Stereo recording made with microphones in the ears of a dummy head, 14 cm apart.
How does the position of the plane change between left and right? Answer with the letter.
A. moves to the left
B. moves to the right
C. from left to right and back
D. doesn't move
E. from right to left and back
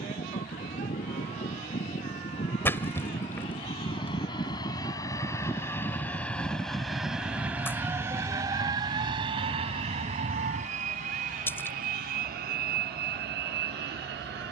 B.